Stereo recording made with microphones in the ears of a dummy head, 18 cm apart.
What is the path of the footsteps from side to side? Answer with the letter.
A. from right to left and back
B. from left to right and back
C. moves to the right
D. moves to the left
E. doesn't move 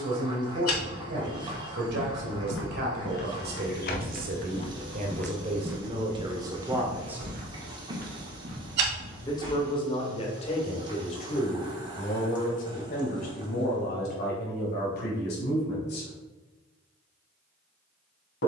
C.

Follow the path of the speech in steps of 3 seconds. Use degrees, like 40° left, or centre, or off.
60° right, 40° right, 20° right, 30° left, 50° left, 60° left.